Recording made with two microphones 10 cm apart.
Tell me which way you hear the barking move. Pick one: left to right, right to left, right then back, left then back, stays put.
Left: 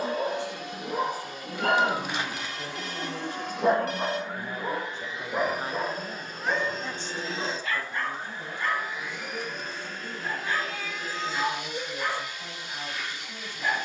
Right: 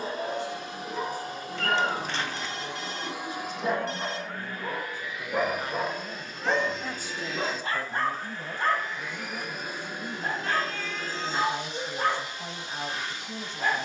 left to right.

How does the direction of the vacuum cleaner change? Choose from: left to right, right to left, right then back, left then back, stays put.
left then back.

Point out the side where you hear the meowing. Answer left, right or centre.
centre.